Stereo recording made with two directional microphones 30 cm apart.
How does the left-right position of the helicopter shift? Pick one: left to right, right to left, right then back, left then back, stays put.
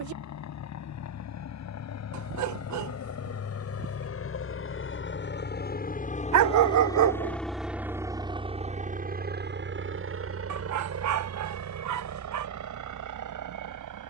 left to right.